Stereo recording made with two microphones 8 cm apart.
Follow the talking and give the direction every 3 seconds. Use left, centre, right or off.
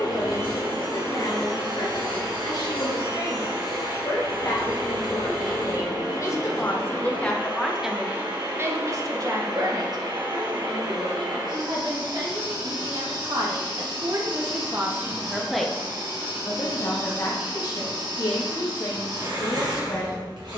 left, left, centre, right, right, left, left.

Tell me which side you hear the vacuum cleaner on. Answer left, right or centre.
right.